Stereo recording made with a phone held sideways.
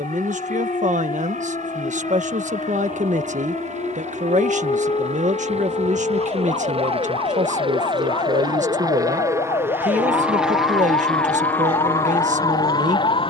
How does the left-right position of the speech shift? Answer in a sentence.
You can hear the speech stay put.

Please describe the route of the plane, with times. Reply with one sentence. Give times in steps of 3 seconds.
You can hear the plane on the right from 0 s, in the centre from 9 s and on the left from 12 s.